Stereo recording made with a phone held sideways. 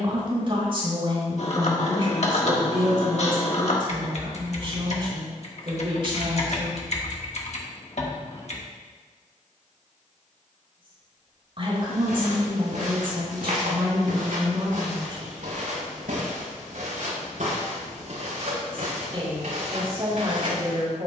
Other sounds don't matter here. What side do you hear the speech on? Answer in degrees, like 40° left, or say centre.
40° right.